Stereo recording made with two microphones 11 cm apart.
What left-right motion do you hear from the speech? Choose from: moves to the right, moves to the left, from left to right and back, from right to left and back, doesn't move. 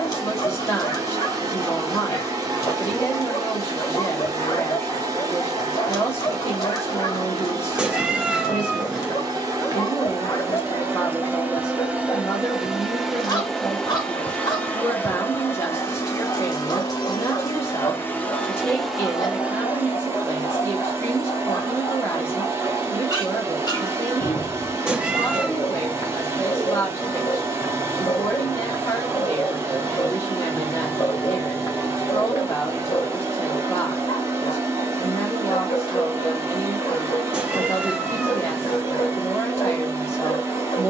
doesn't move.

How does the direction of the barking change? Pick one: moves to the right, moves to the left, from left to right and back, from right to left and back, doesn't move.
doesn't move.